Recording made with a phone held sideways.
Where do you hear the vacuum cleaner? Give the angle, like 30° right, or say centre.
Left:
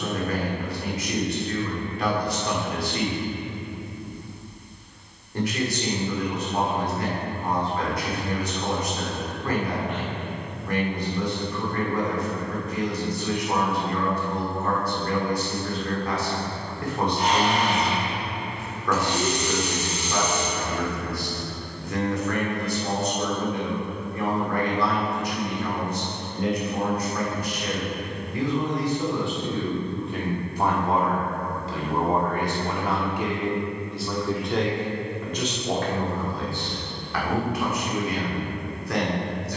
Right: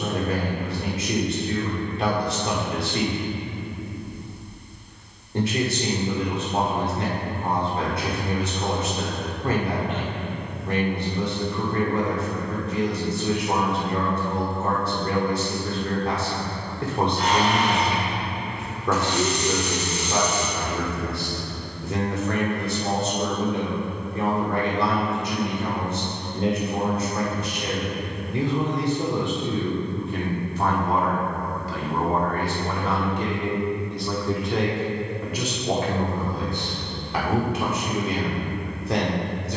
20° left.